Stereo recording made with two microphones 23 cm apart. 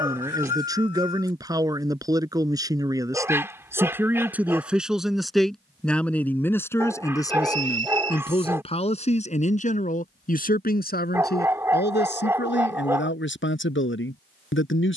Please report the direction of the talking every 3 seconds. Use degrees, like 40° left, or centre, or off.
20° right, centre, 20° left, 40° left, 50° left.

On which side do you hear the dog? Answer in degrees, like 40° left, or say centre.
10° right.